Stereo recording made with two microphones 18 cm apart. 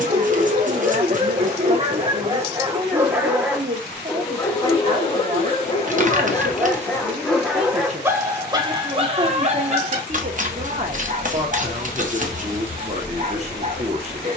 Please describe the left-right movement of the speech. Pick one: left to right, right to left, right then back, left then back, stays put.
stays put.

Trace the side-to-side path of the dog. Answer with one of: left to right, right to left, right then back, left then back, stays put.
left then back.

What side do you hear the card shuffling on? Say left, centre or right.
right.